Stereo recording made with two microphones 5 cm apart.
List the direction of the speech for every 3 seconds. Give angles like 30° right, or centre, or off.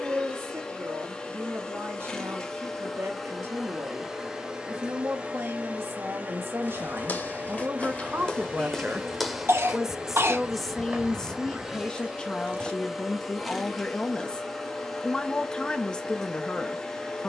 70° right, 70° right, 50° right, centre, 20° left, 20° left.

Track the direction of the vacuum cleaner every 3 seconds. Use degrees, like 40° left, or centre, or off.
20° left, 20° right, 30° right, 20° right, centre, 10° left.